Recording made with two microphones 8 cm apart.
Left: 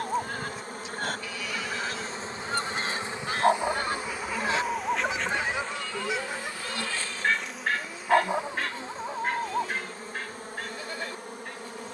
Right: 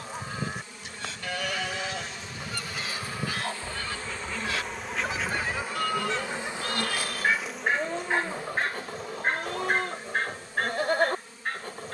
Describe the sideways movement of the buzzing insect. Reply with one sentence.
In this clip you hear the buzzing insect go right and come back.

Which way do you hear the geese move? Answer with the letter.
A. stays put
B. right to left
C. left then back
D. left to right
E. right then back
D.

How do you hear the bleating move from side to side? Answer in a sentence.
You can hear the bleating stay in one place.